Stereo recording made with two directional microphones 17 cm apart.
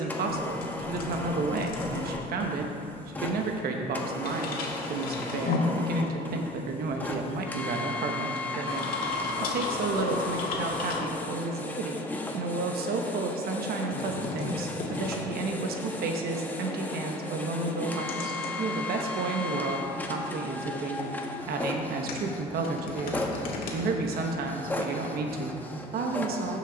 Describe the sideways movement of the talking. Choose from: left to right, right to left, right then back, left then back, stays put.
stays put.